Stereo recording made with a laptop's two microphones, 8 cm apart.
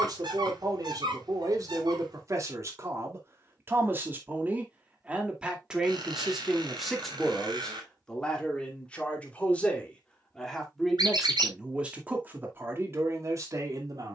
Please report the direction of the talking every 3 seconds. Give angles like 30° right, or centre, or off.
50° right, 20° right, centre, centre, 40° right.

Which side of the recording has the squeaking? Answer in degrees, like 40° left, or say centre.
70° right.